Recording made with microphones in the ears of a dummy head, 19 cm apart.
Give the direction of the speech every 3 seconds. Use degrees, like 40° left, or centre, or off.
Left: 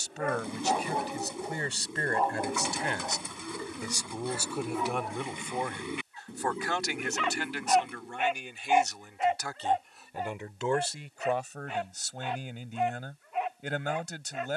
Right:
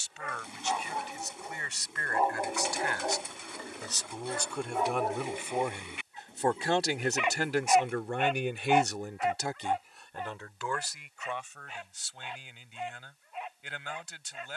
30° left, centre, 40° right, 10° left, 40° left.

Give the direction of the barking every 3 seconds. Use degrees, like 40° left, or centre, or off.
20° left, 40° right, 10° right, 40° left, 60° left.